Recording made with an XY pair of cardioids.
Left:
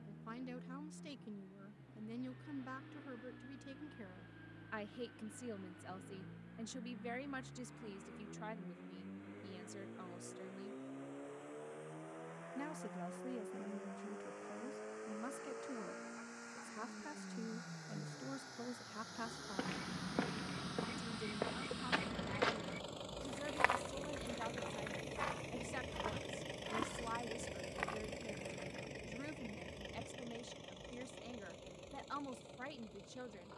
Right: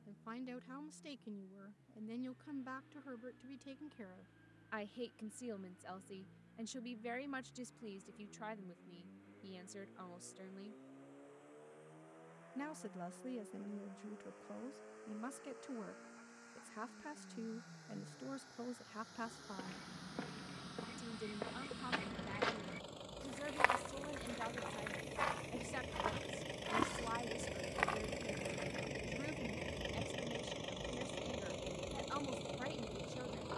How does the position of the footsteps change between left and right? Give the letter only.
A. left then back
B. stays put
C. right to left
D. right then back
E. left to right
E.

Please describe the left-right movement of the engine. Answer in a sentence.
In this clip you hear the engine move from left to right.